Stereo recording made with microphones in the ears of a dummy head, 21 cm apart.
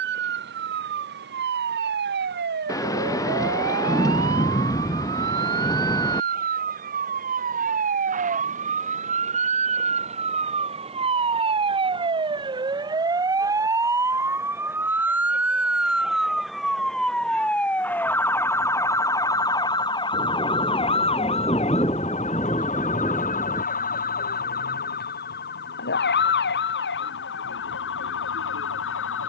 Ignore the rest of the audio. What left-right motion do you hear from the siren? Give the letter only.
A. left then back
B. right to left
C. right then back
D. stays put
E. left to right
B.